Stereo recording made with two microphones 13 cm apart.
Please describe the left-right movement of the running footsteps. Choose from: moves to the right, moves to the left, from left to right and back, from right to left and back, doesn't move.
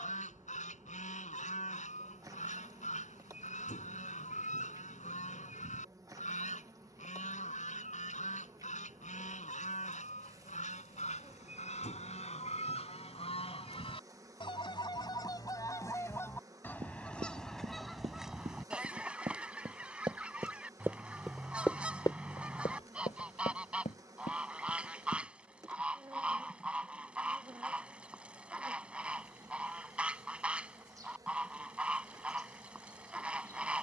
moves to the left.